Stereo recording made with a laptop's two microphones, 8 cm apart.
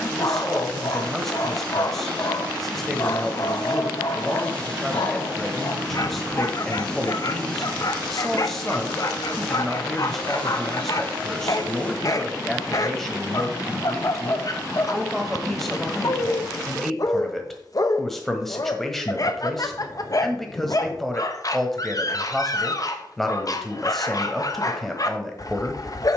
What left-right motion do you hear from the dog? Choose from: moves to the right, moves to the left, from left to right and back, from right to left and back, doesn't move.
doesn't move.